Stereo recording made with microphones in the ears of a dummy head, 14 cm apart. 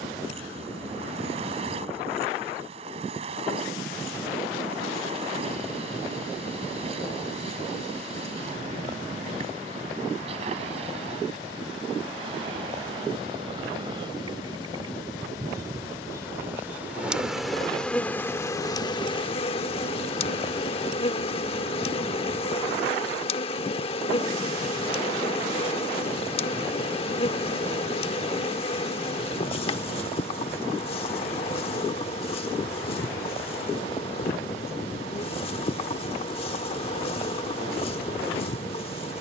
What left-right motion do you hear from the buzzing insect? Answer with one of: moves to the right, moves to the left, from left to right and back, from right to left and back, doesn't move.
moves to the left.